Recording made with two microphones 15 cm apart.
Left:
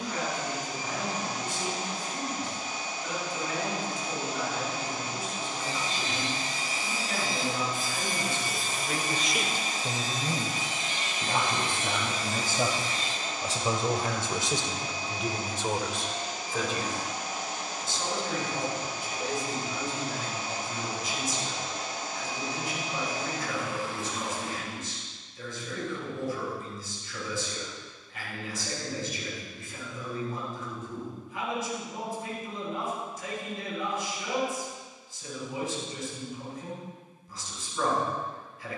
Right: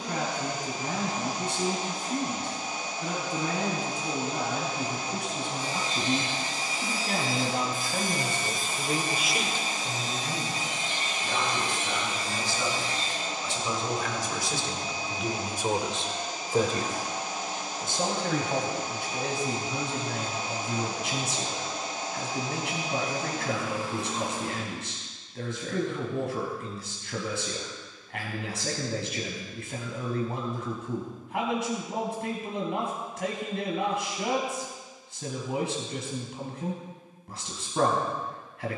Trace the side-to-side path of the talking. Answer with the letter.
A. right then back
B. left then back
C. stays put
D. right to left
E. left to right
B.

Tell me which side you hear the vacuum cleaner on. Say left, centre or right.
right.